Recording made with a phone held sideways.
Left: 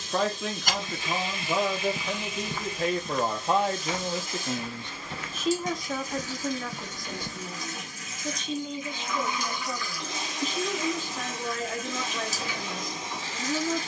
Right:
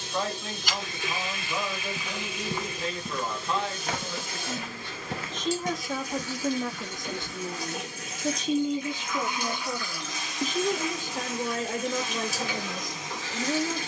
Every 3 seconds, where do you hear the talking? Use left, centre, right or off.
left, left, right, right, right.